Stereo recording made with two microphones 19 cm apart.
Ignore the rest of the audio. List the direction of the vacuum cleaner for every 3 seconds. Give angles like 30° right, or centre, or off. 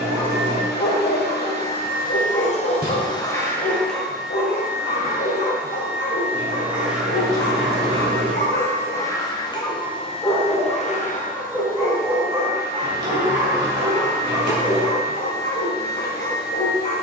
50° left, centre, centre, 30° left, 50° left, 50° left.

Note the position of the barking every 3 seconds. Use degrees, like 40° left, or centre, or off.
70° left, 70° left, 70° left, 10° left, 20° right, 60° left.